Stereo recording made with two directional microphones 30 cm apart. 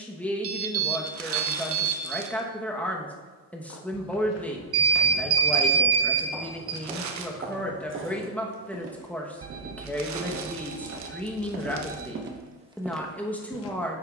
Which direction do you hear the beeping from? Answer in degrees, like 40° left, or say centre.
50° right.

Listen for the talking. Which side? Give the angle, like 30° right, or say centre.
centre.